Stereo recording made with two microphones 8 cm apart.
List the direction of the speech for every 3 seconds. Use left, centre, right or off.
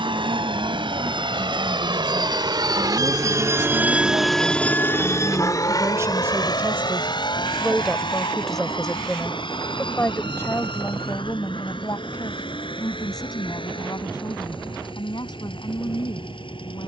right, right, centre, left, left, left.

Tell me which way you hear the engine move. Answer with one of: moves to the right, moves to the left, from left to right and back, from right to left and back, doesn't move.
moves to the left.